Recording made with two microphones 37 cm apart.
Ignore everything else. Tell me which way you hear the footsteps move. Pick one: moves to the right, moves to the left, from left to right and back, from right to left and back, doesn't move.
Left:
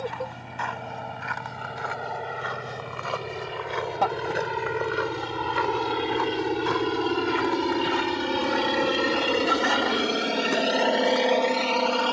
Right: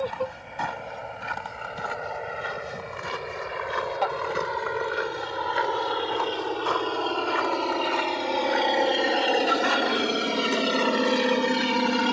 moves to the left.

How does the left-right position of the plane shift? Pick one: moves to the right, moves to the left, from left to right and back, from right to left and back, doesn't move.
moves to the right.